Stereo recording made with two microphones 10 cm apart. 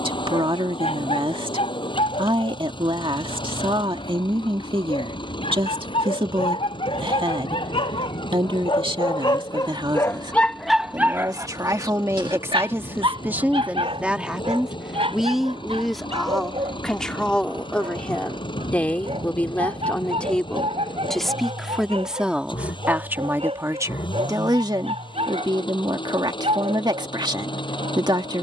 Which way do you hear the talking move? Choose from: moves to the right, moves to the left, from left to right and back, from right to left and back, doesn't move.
from right to left and back.